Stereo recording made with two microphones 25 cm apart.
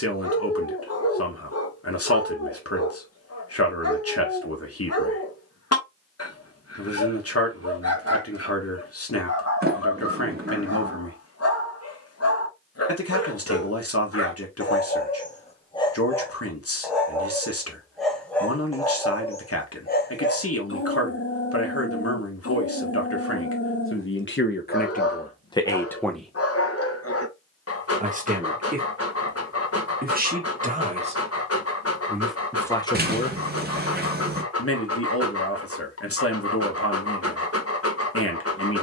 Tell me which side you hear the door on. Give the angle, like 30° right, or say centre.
40° right.